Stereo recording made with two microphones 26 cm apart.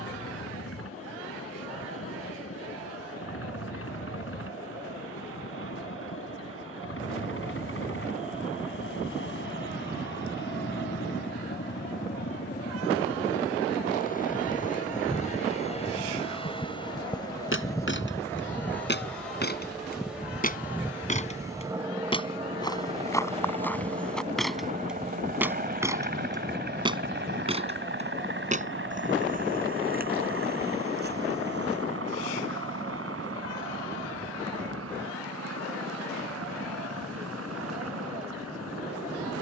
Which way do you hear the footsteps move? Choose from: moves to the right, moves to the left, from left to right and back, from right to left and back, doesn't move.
moves to the right.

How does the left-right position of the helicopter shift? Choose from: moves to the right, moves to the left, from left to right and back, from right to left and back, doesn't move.
moves to the right.